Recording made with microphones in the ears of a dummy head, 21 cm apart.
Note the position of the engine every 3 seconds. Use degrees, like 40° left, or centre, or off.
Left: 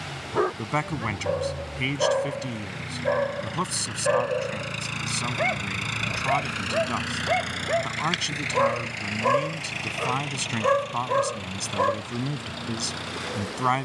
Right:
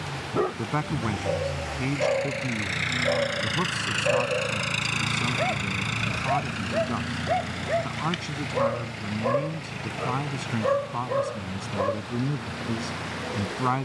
60° right, 20° right, 40° left, 70° left, 80° left.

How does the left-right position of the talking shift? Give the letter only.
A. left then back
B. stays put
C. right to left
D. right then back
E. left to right
B.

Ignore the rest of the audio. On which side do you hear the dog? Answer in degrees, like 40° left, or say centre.
40° left.